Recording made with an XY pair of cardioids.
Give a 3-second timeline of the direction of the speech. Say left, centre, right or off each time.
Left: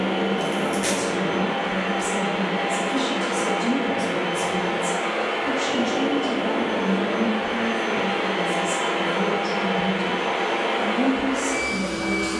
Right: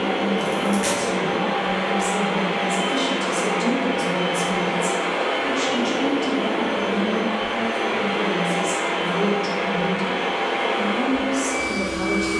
centre, right, right, right.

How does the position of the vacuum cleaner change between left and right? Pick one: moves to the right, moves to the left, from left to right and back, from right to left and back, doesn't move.
moves to the left.